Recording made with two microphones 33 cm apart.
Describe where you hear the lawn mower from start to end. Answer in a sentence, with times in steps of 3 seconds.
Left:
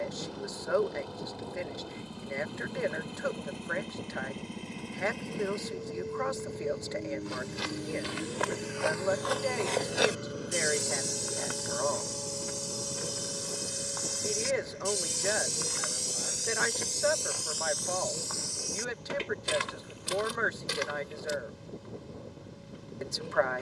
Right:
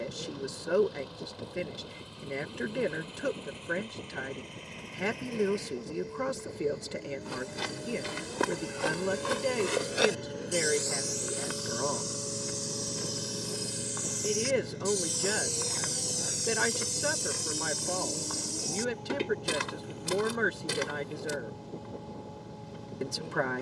In this clip you hear the lawn mower on the left from 0 s, in the centre from 9 s and on the right from 12 s.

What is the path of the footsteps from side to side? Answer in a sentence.
You can hear the footsteps move from right to left and back again.